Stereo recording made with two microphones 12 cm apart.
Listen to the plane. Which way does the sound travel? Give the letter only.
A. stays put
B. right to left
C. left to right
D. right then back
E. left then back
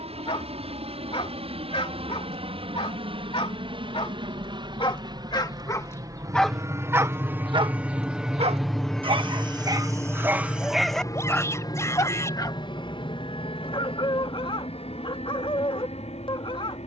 B.